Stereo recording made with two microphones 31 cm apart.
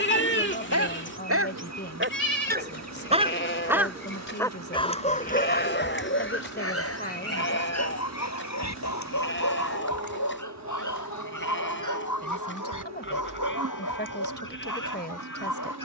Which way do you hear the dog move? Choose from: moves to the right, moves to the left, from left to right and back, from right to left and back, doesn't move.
moves to the left.